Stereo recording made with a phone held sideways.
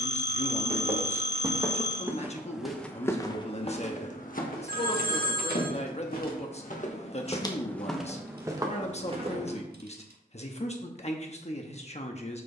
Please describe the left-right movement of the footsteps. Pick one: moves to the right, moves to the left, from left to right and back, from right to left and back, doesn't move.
from right to left and back.